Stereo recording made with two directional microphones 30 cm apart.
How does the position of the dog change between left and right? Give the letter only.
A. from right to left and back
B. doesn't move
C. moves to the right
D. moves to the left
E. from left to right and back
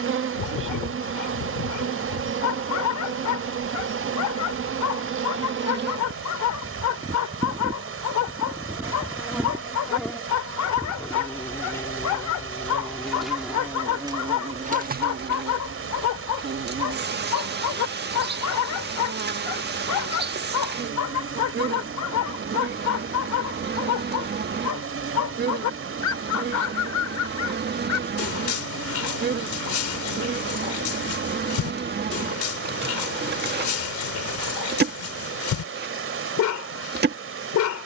B.